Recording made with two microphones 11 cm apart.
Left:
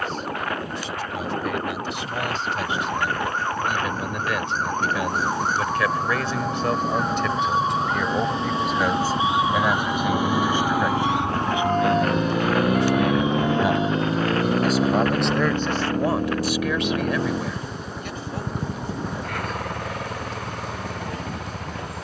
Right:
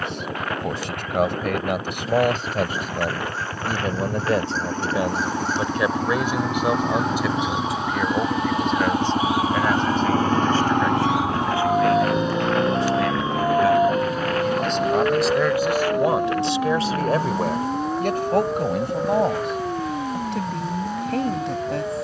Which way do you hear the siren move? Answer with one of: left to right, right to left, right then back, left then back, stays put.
left to right.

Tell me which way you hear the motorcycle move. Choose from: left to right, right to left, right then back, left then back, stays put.
right to left.